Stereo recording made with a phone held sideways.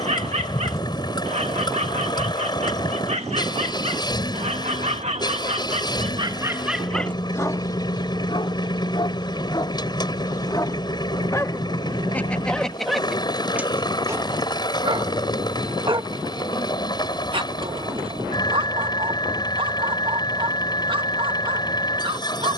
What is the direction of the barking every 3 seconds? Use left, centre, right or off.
right, right, centre, left, centre, right, right, right.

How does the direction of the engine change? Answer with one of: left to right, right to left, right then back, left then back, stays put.
stays put.